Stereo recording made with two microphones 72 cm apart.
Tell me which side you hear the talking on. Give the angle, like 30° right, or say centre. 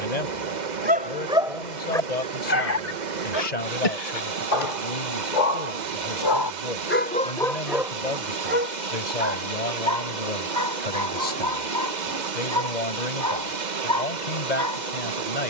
70° left.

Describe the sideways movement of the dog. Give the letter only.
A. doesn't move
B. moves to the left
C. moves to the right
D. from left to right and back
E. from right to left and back
E.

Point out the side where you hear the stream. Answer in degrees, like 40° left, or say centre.
80° right.